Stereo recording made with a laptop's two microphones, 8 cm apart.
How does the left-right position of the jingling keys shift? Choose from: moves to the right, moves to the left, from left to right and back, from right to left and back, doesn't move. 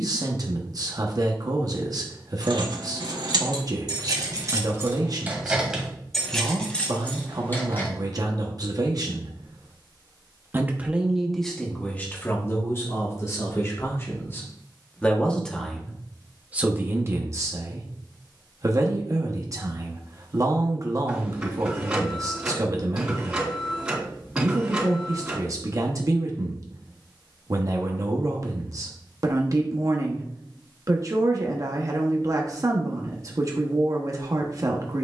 moves to the left.